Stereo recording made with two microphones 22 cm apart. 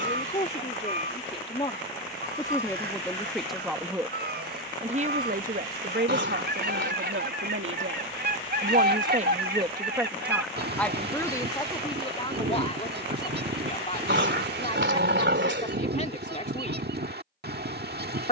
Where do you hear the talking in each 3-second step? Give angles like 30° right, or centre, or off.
30° left, 20° right, 60° right, centre, 30° left, 30° left.